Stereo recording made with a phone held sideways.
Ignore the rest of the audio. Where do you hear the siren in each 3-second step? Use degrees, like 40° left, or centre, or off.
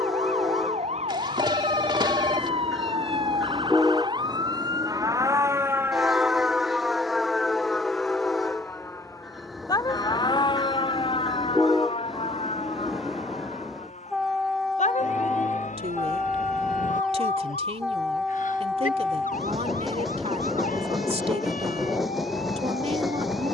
50° right, 30° right, centre, 30° left, 50° left, 60° left, 70° left, 70° left.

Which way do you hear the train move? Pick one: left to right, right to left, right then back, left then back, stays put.
stays put.